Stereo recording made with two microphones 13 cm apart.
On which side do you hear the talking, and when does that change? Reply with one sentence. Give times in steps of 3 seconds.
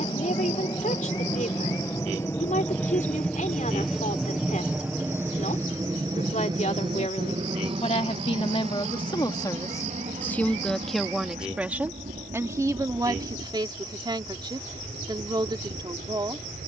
You can hear the talking on the left from 0 s, in the centre from 9 s and on the right from 12 s.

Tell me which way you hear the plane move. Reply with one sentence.
In this clip you hear the plane move to the right.